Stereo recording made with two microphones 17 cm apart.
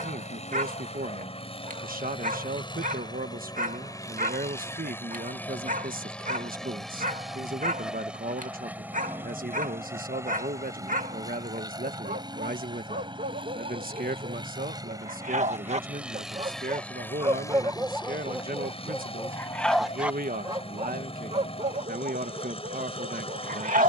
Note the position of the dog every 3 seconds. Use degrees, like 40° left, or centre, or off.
50° right, 50° right, 50° right, 50° right, 50° right, 30° right, centre, 50° right.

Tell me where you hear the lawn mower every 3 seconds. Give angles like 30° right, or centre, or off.
40° left, 20° left, centre, 20° right, 30° right, centre, 40° left, 40° left.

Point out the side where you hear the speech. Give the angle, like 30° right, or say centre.
60° right.